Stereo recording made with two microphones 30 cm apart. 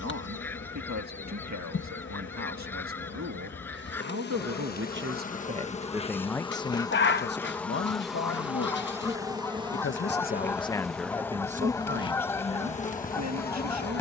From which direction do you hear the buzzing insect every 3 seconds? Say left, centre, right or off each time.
left, left, centre, centre, left.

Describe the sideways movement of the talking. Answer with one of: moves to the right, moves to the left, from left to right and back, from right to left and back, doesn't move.
from right to left and back.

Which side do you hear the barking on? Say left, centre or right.
left.